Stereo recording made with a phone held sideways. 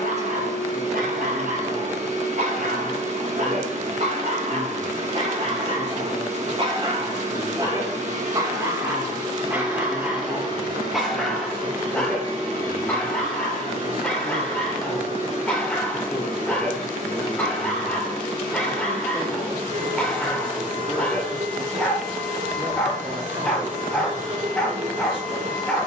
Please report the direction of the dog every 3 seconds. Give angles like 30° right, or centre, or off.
70° right, 60° right, 30° right, 10° right, 10° left, 10° left, 10° left, 10° left, 10° left.